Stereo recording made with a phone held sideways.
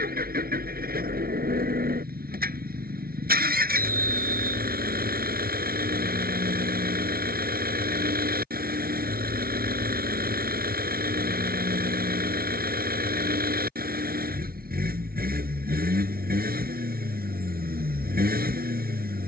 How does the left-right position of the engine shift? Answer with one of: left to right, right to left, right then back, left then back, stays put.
stays put.